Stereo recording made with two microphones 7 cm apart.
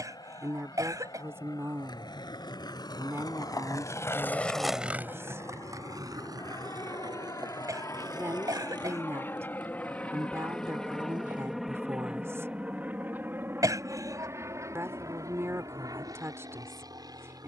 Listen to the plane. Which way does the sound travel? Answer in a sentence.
In this clip you hear the plane move to the right.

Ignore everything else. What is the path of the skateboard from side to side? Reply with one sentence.
In this clip you hear the skateboard go from the left side to the right.